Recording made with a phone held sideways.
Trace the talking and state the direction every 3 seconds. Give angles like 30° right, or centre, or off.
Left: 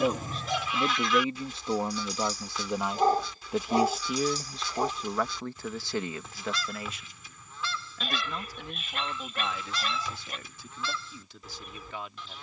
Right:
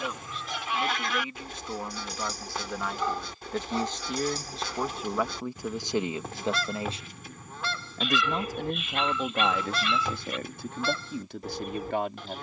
30° left, centre, 40° right, 60° right.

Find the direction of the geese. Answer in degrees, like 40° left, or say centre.
60° right.